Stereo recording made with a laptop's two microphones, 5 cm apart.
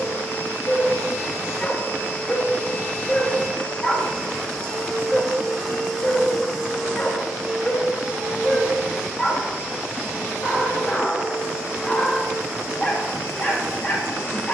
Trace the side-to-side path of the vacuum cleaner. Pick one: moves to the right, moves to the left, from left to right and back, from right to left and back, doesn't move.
moves to the right.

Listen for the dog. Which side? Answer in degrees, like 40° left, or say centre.
20° left.